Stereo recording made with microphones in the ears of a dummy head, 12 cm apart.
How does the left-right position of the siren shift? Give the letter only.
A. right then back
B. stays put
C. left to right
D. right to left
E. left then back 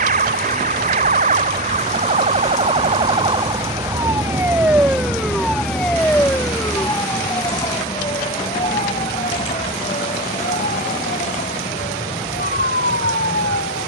D.